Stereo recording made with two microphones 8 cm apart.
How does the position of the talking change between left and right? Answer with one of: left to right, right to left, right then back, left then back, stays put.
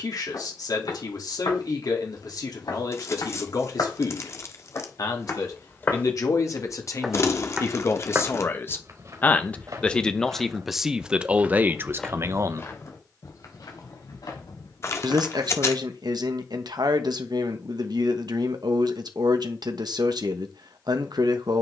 left to right.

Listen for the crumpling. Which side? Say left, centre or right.
left.